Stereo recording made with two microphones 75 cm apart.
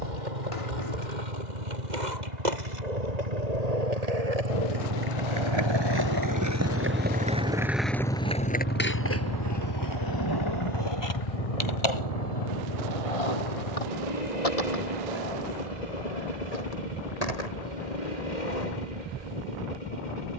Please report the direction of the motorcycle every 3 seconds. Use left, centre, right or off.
right, right, centre, left, left, left, left.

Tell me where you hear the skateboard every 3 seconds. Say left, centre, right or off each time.
right, right, centre, left, left, left, left.